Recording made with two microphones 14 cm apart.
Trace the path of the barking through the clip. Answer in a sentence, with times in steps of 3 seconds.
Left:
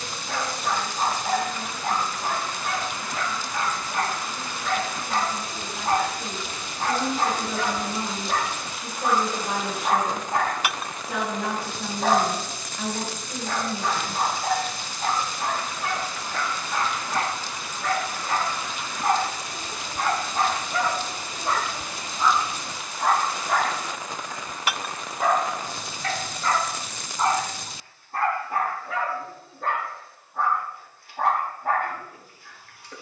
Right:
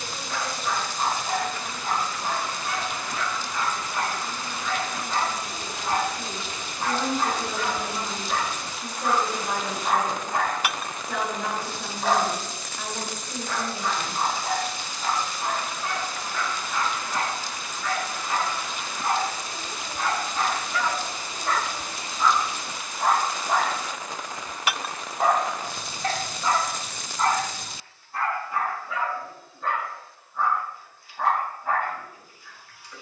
You can hear the barking on the left from 0 s, in the centre from 21 s, on the right from 24 s and on the left from 27 s.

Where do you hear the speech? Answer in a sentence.
In this clip you hear the speech in the centre.